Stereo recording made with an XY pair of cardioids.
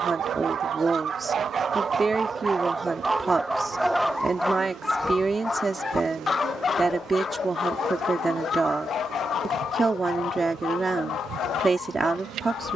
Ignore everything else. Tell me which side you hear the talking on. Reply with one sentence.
In this clip you hear the talking on the right.